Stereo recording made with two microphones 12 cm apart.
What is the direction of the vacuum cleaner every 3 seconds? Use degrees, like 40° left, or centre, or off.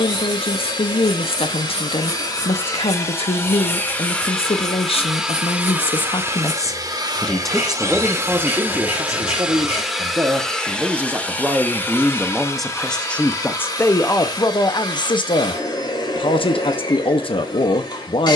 40° left, 10° left, 20° right, centre, 30° left, 40° left.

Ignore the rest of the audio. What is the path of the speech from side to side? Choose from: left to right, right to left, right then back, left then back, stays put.
right then back.